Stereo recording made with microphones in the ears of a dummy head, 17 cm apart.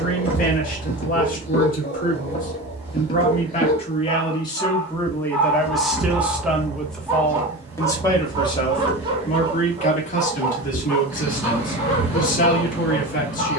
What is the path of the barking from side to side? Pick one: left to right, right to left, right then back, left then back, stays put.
right then back.